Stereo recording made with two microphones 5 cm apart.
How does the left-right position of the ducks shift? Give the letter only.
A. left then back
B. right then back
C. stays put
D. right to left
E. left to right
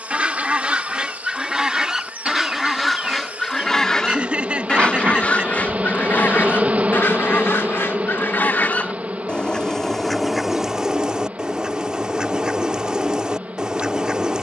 A.